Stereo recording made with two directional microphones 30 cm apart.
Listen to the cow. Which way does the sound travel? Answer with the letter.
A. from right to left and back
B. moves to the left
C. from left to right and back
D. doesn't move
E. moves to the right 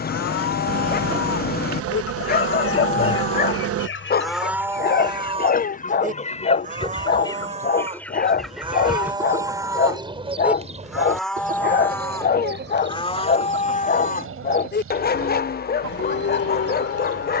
C.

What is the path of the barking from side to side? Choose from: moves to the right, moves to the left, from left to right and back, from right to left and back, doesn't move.
doesn't move.